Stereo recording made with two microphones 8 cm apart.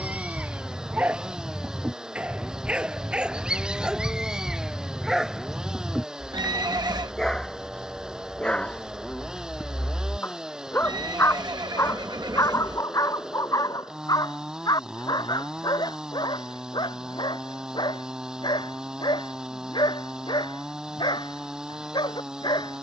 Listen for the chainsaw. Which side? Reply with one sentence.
In this clip you hear the chainsaw in the centre.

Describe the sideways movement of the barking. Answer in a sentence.
In this clip you hear the barking move to the left.